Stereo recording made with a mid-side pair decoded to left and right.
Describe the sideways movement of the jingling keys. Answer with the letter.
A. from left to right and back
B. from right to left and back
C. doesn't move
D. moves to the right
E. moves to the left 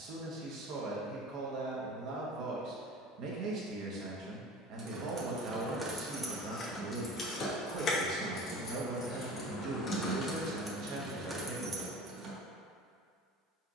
B.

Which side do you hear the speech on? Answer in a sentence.
In this clip you hear the speech on the right.